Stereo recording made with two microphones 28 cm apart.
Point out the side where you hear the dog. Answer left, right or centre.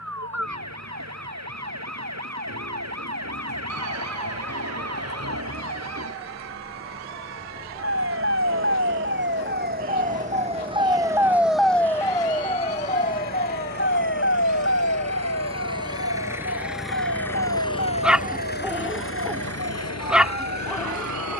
centre.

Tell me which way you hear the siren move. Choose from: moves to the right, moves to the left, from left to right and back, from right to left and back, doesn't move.
moves to the left.